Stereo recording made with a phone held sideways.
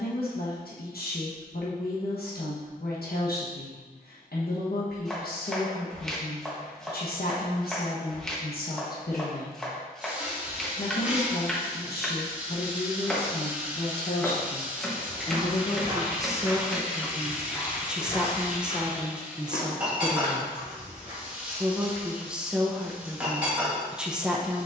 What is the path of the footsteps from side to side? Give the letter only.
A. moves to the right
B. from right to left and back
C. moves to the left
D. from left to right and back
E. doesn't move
C.